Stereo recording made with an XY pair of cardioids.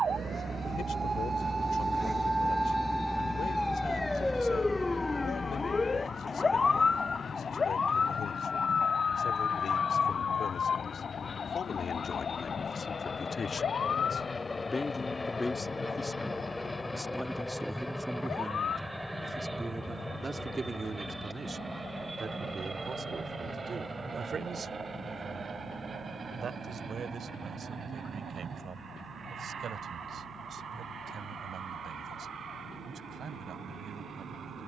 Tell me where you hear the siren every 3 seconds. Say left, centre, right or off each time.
right, centre, left, left, left, left, left, left, left, left, left, left.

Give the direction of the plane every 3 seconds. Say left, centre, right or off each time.
left, left, left, left, left, centre, centre, right, right, right, right, right.